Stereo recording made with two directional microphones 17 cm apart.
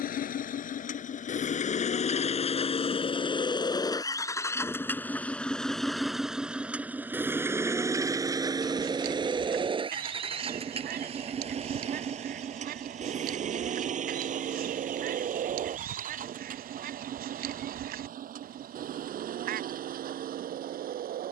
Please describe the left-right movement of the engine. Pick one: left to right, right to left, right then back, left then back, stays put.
left to right.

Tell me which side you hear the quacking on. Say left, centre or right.
right.